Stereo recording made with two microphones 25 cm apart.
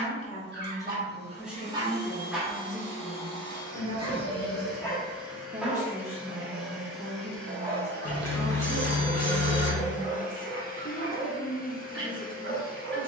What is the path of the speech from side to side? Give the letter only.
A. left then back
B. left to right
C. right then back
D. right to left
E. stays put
C.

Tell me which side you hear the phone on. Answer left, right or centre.
left.